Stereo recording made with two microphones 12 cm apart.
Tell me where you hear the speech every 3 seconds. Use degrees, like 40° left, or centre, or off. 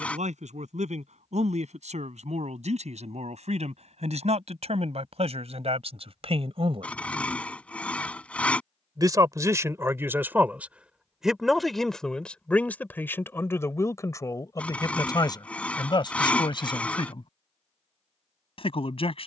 70° right, 60° right, 50° right, 10° right, 20° left, 40° left, 50° left.